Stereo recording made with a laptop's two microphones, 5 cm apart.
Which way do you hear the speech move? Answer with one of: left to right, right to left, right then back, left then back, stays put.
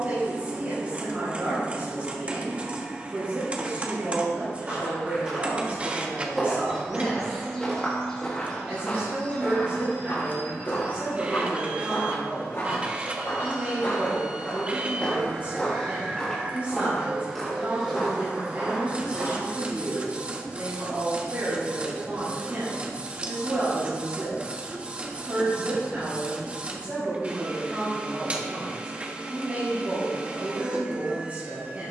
stays put.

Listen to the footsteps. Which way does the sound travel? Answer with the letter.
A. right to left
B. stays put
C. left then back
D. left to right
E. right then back
C.